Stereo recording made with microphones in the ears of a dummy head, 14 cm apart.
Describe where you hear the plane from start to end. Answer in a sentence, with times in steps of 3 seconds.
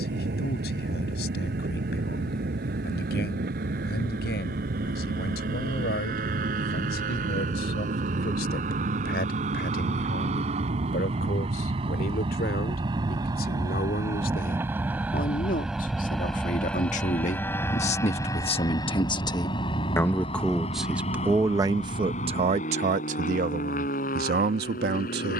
You can hear the plane on the right from 0 s, in the centre from 15 s and on the left from 18 s.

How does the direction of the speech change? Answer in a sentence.
In this clip you hear the speech go from the left side to the right.